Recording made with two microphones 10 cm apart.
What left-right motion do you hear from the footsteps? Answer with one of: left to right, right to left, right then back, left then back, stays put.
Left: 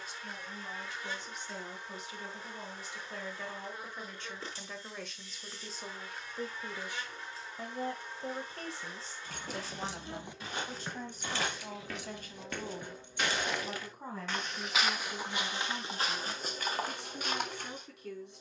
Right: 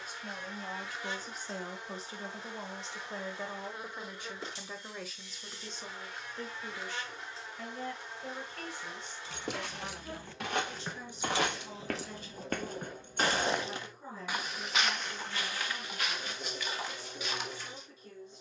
right to left.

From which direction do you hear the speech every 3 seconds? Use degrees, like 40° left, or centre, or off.
40° right, 10° right, 20° left, 40° left, 50° left, 60° left.